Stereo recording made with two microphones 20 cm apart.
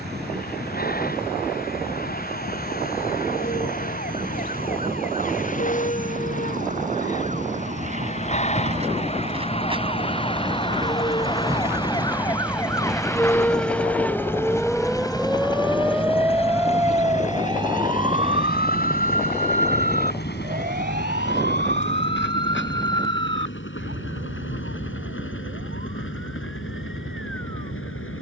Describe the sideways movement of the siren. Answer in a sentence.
You can hear the siren travel towards the right.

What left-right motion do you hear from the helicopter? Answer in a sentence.
In this clip you hear the helicopter move from right to left.